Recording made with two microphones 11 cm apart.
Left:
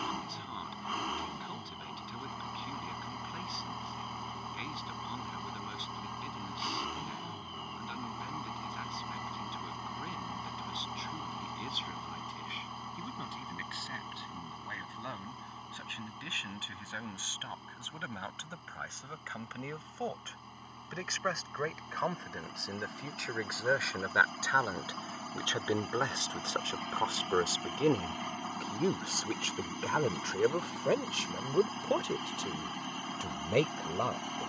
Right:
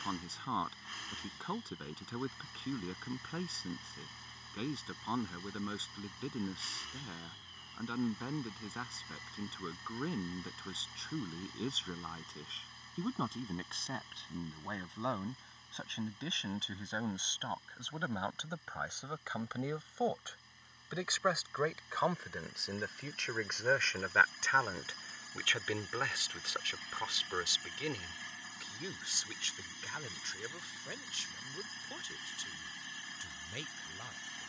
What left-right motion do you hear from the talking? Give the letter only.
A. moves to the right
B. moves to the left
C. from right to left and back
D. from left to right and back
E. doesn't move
B.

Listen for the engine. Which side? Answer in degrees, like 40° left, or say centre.
60° left.